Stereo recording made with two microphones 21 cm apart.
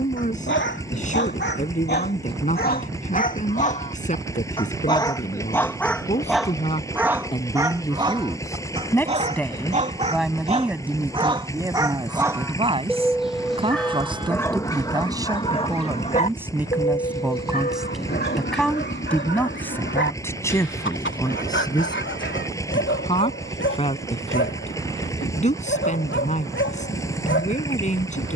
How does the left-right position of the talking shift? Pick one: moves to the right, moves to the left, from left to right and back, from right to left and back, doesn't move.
from left to right and back.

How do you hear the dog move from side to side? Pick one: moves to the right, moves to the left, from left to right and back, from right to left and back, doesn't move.
from left to right and back.